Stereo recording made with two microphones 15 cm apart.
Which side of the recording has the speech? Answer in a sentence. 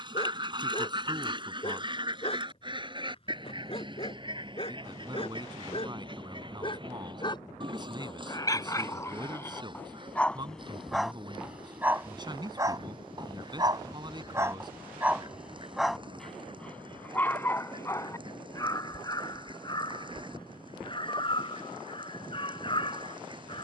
In this clip you hear the speech on the right.